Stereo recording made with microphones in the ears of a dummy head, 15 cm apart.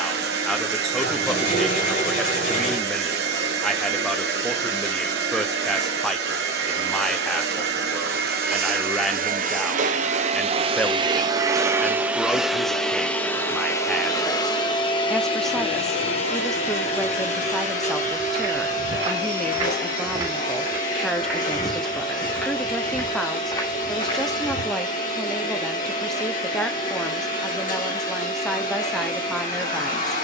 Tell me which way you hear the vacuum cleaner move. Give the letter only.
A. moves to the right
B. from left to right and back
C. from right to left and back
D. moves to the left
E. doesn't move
D.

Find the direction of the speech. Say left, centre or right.
centre.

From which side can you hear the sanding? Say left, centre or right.
left.